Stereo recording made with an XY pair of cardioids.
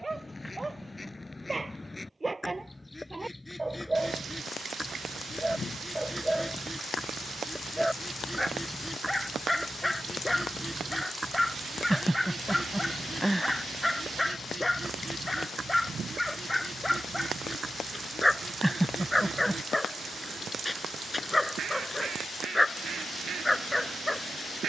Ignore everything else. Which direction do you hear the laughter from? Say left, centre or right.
centre.